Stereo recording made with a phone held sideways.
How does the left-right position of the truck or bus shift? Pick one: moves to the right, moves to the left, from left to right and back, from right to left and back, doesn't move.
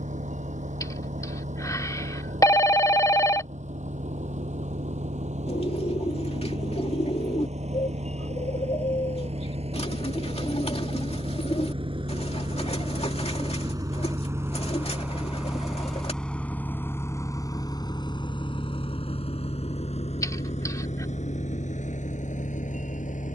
moves to the left.